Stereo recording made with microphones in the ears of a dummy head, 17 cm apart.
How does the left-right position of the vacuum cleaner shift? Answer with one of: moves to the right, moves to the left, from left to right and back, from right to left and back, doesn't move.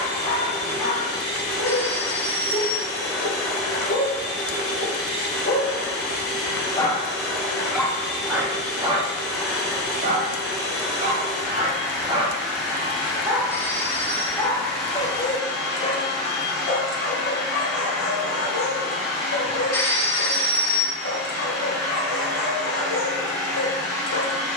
doesn't move.